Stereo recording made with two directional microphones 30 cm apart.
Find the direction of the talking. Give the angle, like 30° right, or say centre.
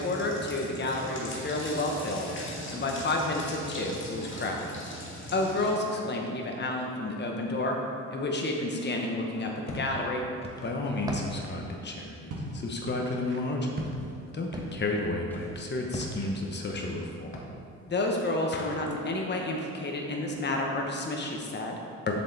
40° left.